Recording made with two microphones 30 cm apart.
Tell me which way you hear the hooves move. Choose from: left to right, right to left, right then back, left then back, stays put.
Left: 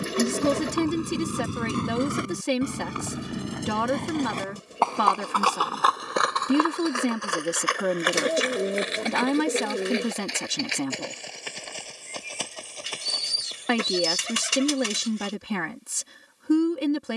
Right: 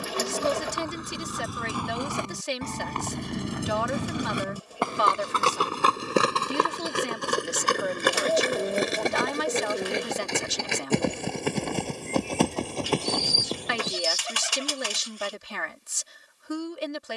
left to right.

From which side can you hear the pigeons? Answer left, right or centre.
left.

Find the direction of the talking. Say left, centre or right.
left.